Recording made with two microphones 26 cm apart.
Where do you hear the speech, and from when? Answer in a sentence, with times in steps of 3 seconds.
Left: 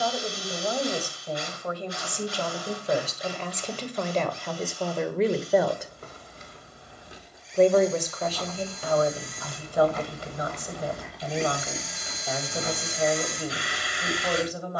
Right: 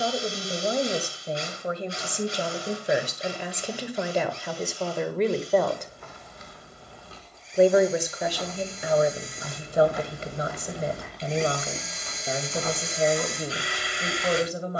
In this clip you hear the speech on the right from 0 s, in the centre from 3 s and on the right from 9 s.